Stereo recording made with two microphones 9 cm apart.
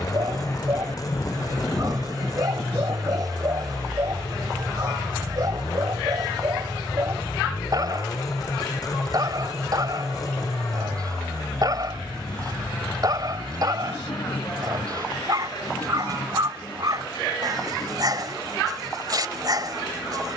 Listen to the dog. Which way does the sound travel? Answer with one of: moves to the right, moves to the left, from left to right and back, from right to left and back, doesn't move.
doesn't move.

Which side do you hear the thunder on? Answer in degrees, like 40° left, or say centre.
30° left.